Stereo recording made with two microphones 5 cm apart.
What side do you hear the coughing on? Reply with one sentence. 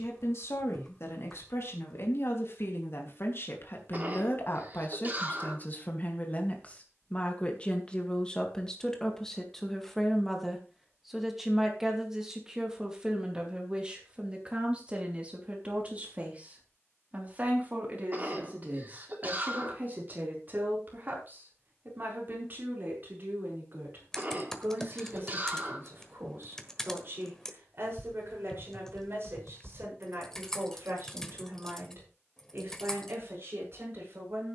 In this clip you hear the coughing on the right.